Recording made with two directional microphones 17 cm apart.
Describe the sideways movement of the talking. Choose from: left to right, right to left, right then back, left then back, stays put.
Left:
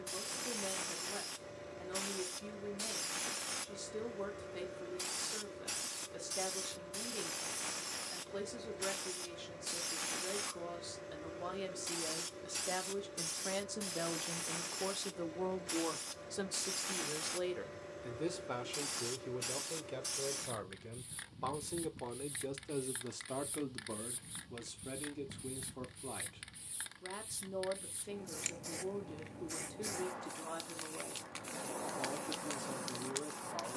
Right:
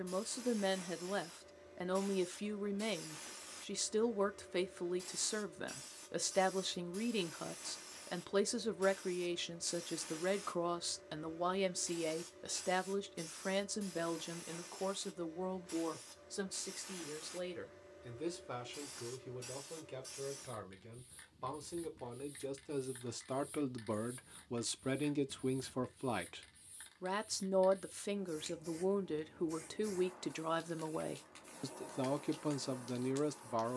left then back.